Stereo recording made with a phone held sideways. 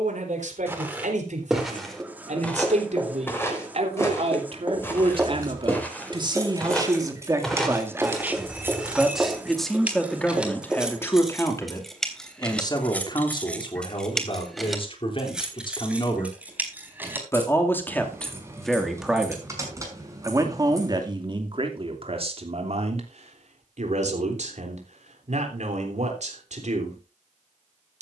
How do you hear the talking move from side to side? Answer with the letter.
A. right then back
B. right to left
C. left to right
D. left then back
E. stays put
D.